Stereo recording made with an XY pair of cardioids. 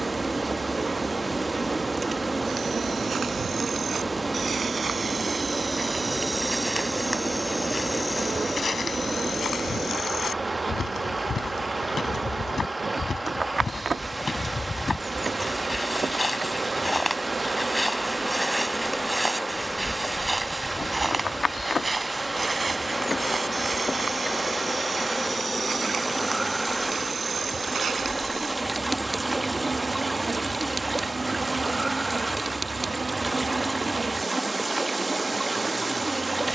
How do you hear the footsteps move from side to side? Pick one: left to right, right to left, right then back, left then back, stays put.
left then back.